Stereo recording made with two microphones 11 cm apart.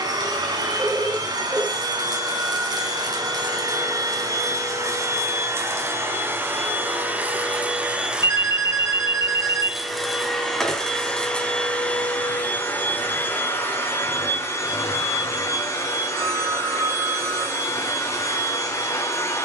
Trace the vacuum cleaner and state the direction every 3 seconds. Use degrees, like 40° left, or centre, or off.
40° right, 30° right, 10° right, centre, 20° left, 20° left, 20° left.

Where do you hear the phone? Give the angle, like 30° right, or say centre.
30° right.